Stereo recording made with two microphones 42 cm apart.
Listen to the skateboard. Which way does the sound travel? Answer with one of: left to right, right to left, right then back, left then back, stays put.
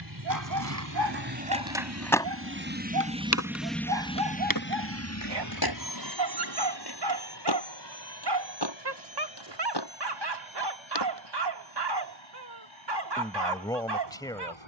right to left.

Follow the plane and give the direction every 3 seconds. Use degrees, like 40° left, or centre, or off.
50° right, 20° left, 60° left, 70° left, 80° left.